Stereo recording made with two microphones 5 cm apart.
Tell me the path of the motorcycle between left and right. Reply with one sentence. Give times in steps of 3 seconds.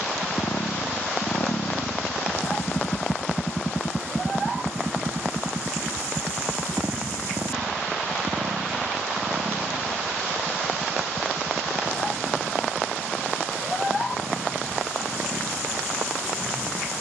In this clip you hear the motorcycle on the left from 0 s and on the right from 3 s.